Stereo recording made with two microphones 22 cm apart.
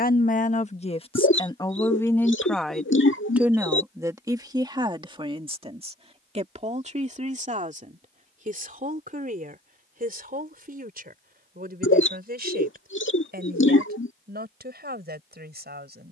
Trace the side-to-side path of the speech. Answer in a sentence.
You can hear the speech move to the right.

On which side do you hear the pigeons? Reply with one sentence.
You can hear the pigeons on the left.